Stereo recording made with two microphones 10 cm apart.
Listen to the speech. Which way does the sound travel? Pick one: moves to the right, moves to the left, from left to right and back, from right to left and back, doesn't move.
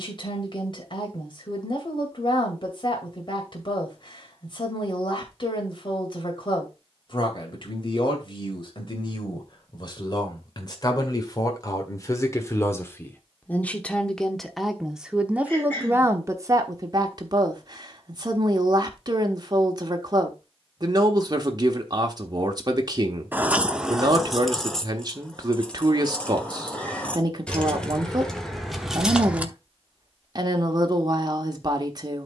moves to the right.